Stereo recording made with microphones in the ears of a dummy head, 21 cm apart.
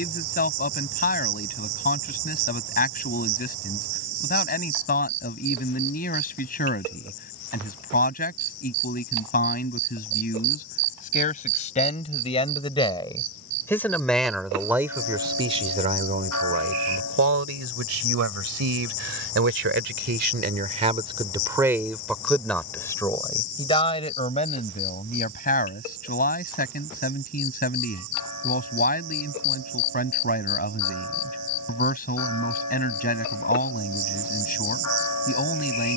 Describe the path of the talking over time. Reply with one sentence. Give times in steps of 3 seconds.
In this clip you hear the talking on the left from 0 s, in the centre from 12 s, on the right from 15 s, in the centre from 21 s and on the left from 24 s.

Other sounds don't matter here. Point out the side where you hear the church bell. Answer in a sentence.
In this clip you hear the church bell on the left.